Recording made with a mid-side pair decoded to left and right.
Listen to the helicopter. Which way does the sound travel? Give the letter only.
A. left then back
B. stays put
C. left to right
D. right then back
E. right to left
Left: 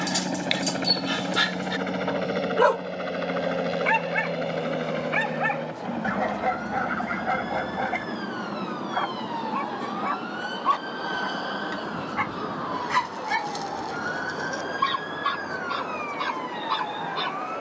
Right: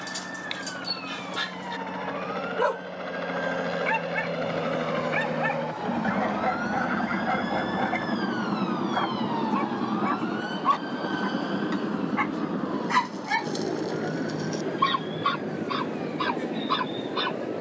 C.